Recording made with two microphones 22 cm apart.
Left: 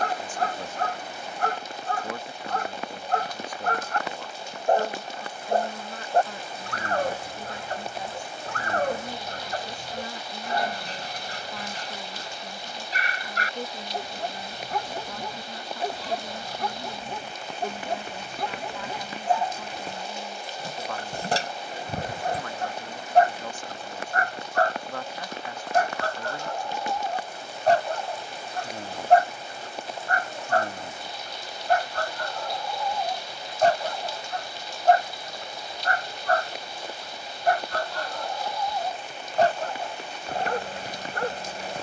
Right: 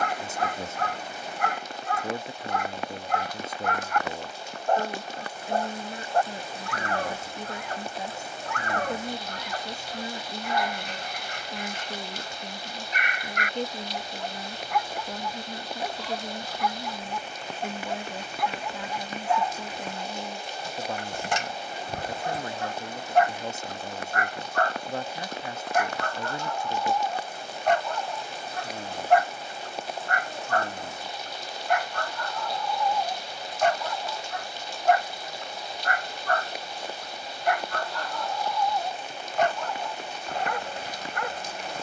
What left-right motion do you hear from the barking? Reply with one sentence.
In this clip you hear the barking stay put.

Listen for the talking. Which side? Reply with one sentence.
In this clip you hear the talking on the right.